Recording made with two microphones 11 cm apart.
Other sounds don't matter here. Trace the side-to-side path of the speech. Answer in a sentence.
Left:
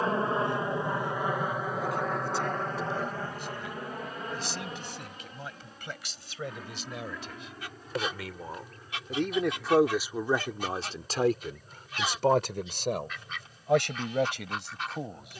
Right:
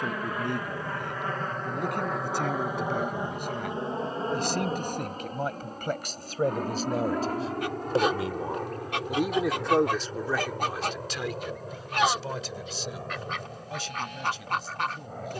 You can hear the speech travel towards the left.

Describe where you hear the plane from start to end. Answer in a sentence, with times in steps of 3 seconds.
You can hear the plane in the centre from 0 s and on the right from 3 s.